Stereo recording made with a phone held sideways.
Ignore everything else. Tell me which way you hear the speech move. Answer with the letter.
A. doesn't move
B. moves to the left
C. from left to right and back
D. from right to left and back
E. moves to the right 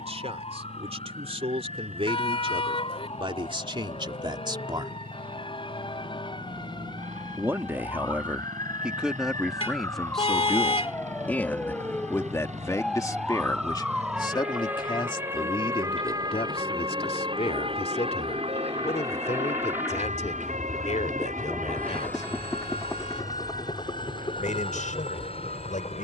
B.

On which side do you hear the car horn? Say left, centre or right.
left.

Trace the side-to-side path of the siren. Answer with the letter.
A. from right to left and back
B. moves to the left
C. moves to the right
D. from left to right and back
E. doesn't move
C.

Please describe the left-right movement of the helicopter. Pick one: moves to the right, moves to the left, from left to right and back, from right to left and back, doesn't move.
moves to the left.